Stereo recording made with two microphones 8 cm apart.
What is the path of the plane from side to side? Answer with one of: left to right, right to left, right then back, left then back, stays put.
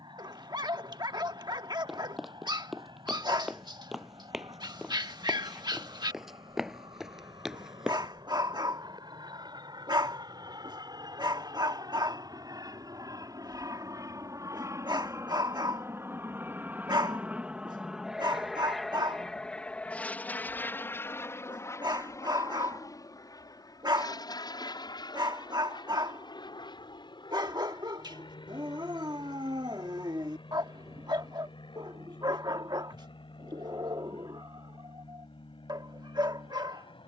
right to left.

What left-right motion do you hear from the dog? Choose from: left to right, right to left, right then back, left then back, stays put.
stays put.